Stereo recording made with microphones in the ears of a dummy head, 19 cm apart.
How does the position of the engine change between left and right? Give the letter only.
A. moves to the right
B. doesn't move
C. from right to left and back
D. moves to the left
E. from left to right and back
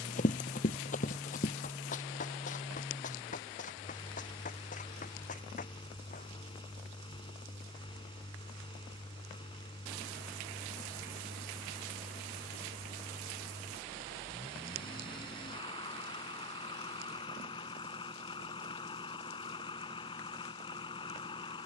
B.